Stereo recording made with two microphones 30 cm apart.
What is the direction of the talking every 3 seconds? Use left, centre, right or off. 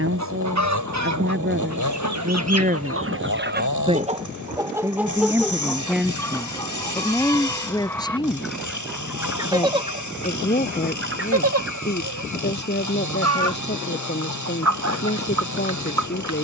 right, centre, centre, left, left, left.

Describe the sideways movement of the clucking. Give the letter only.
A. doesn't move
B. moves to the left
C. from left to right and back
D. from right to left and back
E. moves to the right
D.